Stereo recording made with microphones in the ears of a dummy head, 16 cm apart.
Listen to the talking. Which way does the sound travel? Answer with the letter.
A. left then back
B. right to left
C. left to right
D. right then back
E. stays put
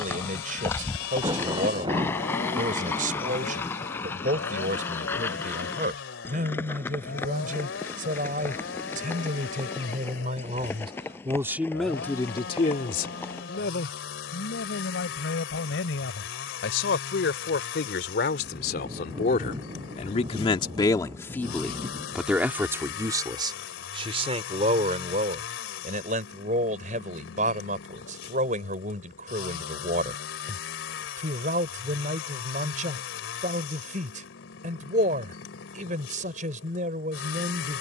A.